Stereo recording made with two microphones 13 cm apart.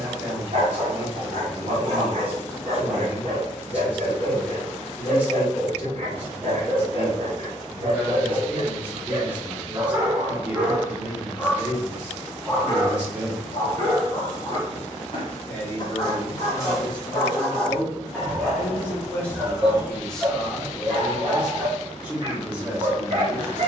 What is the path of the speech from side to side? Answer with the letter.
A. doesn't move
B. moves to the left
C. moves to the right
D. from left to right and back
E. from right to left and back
E.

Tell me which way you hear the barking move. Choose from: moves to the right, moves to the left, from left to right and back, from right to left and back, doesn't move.
from right to left and back.